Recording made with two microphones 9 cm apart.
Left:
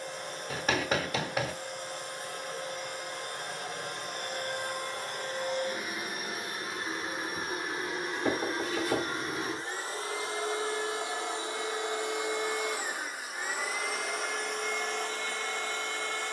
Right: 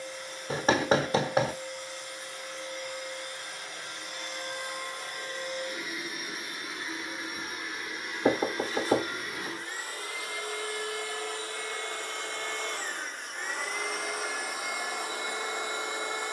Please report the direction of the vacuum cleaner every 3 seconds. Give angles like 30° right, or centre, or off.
50° left, 50° left, 40° left, 30° left, centre, 10° right.